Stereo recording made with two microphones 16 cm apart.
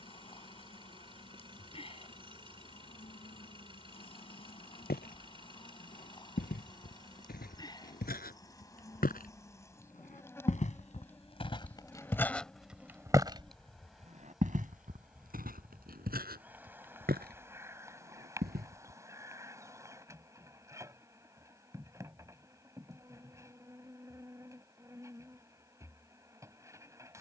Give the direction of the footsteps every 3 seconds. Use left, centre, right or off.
off, left, left, left, right, right, right, off, off.